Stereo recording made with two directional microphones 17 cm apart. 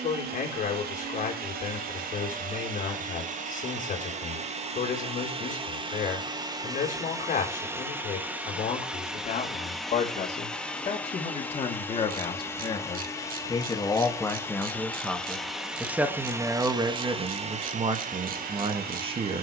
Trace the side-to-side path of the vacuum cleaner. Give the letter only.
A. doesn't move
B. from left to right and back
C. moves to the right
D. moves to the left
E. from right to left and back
E.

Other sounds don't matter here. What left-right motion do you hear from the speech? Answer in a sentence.
In this clip you hear the speech move to the right.